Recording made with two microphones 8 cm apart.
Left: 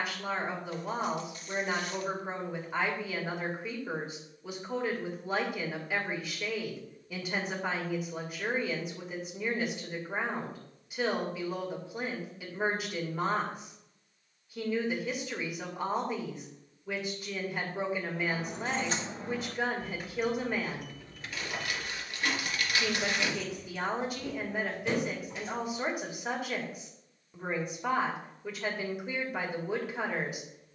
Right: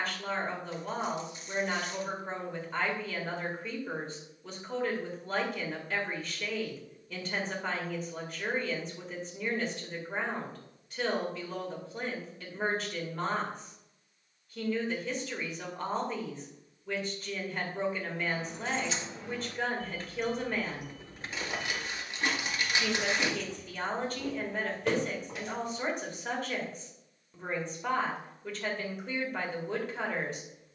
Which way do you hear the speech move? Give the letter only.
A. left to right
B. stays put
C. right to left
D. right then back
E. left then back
B.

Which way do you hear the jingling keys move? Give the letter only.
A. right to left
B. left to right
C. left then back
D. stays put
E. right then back
B.